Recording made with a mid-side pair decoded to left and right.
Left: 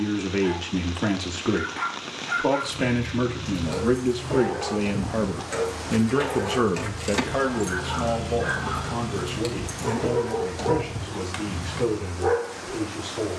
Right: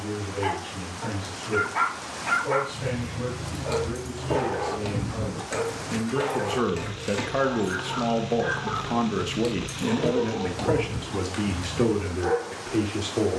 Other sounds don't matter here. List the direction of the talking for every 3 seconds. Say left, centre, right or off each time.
left, left, centre, right, right.